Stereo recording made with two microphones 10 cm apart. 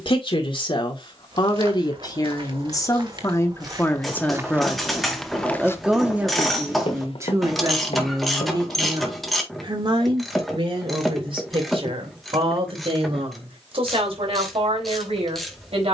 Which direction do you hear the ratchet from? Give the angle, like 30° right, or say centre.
centre.